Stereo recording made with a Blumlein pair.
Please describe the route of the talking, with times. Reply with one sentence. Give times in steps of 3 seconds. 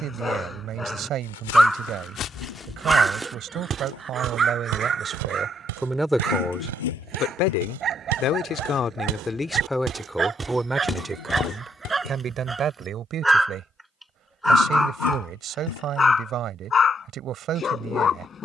In this clip you hear the talking on the right from 0 s, on the left from 6 s, in the centre from 9 s and on the right from 12 s.